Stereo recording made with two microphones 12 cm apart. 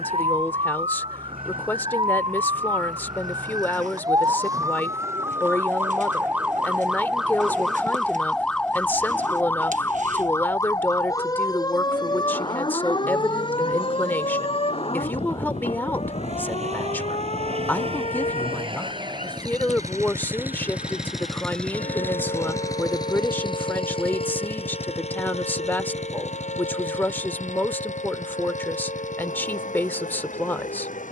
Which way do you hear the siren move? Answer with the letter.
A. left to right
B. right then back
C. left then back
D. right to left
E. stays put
D.